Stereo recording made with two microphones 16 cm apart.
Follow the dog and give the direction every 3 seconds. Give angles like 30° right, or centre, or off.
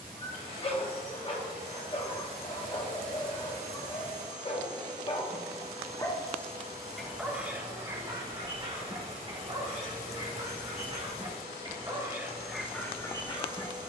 40° left, 40° left, 20° right, 40° right, 10° left.